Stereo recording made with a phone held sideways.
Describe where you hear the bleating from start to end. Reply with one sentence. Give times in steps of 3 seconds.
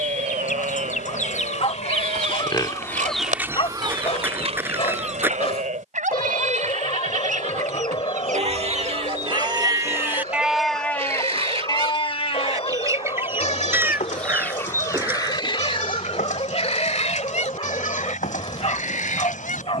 You can hear the bleating on the right from 0 s, in the centre from 9 s and on the left from 12 s.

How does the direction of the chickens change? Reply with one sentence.
In this clip you hear the chickens move from left to right and back again.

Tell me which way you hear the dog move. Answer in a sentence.
In this clip you hear the dog stay in one place.